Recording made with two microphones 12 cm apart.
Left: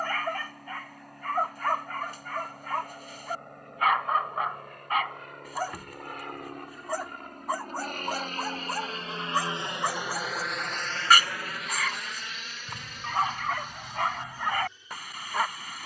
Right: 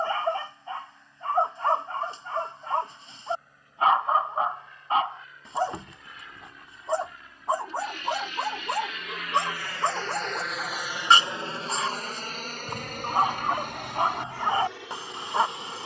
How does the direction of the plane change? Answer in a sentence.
In this clip you hear the plane move to the right.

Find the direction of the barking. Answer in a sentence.
You can hear the barking on the right.